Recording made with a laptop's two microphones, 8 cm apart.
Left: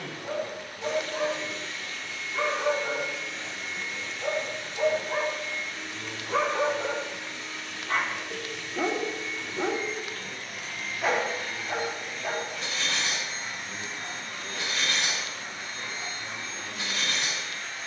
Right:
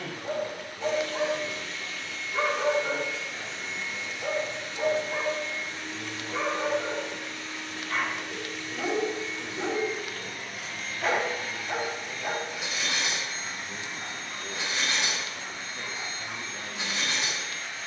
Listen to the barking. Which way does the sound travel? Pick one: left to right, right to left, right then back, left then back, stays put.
left then back.